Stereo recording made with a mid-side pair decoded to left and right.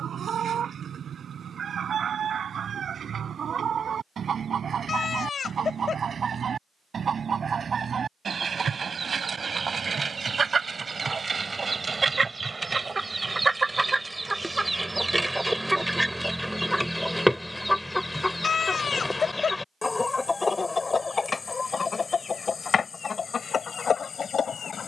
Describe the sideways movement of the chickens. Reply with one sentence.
You can hear the chickens travel towards the left.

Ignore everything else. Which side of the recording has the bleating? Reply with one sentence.
In this clip you hear the bleating on the left.